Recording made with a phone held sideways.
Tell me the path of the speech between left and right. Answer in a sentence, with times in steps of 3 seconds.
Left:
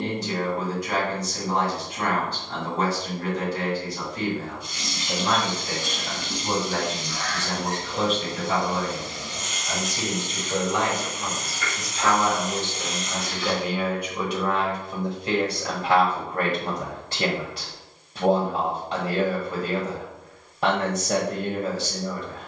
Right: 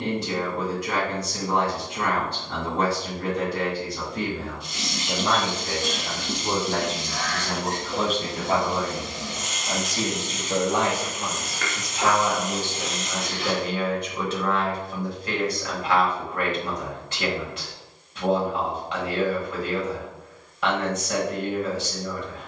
In this clip you hear the speech on the right from 0 s, in the centre from 12 s and on the left from 15 s.